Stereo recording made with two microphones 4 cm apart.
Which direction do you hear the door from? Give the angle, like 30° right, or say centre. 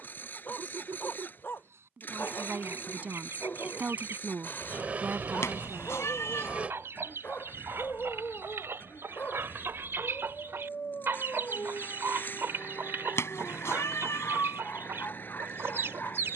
40° right.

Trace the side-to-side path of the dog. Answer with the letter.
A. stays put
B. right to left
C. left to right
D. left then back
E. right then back
A.